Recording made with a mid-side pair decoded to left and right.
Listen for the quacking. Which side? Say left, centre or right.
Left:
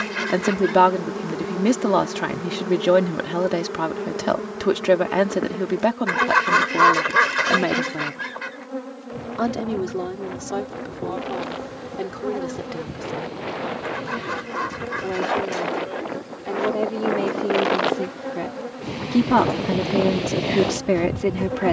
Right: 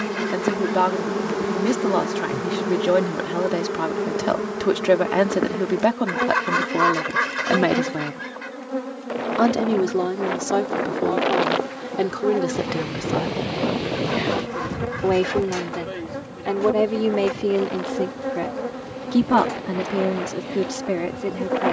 left.